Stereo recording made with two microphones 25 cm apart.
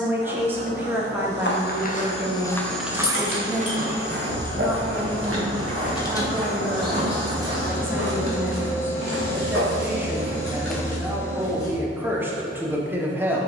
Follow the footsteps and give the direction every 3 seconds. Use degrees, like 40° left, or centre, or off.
20° left, 50° right, 70° right, 40° right, off.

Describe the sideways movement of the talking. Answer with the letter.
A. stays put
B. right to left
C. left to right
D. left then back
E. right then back
A.